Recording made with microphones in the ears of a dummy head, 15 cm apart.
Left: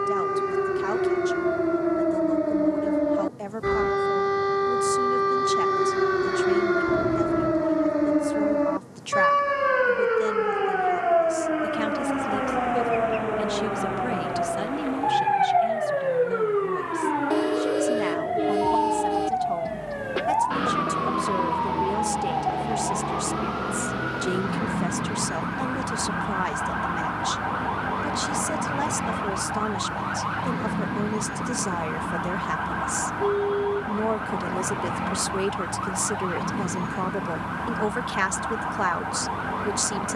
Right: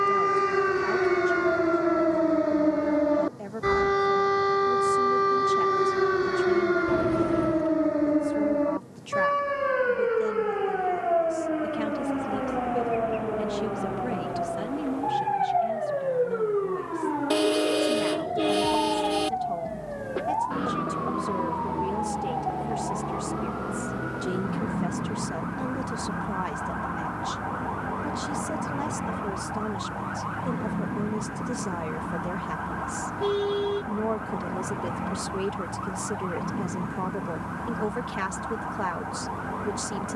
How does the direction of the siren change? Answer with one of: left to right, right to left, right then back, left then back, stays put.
right to left.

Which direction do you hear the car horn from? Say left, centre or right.
right.